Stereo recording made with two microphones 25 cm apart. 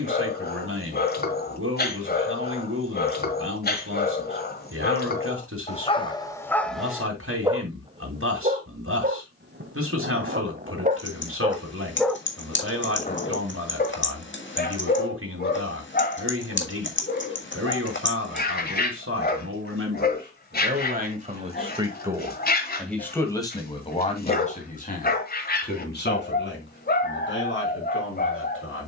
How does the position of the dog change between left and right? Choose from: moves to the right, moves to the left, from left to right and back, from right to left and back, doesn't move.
from left to right and back.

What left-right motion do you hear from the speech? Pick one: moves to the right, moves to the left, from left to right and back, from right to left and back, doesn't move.
moves to the left.